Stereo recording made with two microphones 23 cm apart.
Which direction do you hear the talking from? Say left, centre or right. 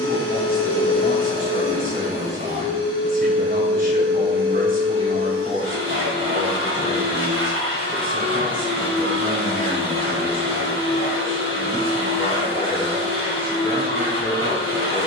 right.